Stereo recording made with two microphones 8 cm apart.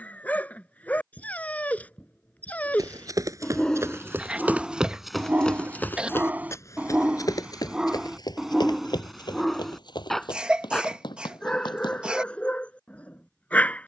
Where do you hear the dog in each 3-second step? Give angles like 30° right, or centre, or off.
20° left, 10° right, 10° right, 10° left, 20° left.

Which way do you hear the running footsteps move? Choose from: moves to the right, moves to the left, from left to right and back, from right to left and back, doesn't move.
moves to the left.